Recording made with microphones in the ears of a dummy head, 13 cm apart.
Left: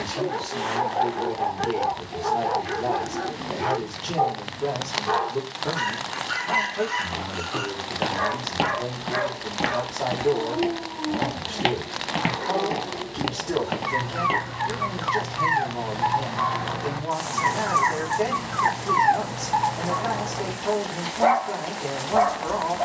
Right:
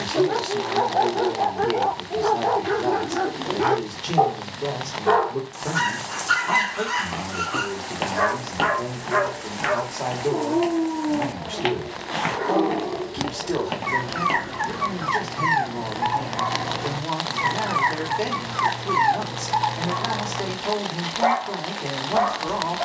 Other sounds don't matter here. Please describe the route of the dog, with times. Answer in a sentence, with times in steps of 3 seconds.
You can hear the dog on the right from 0 s and in the centre from 18 s.